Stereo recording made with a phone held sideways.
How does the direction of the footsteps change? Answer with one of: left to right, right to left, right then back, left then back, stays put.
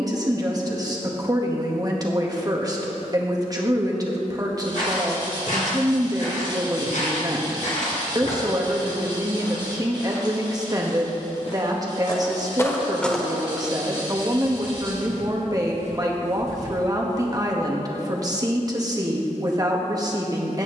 left to right.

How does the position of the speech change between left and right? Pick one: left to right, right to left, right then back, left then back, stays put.
stays put.